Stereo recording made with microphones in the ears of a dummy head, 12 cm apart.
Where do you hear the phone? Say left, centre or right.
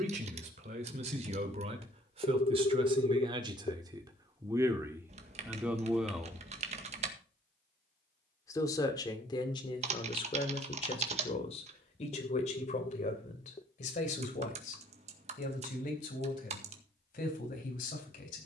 left.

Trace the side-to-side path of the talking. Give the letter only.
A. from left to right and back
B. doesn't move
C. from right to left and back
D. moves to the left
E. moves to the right
D.